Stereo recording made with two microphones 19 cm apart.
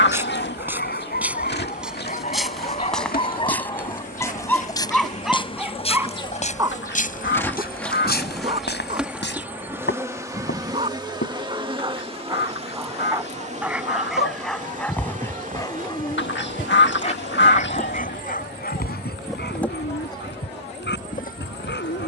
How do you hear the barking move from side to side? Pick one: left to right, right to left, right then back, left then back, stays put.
right then back.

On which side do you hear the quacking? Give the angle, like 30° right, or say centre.
70° left.